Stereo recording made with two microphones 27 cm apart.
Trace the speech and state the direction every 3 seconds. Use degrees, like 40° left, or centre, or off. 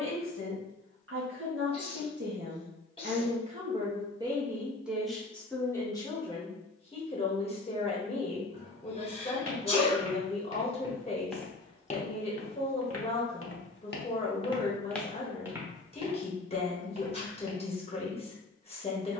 50° right, 10° right, 20° left, 20° left, 20° left, 20° left, 20° left.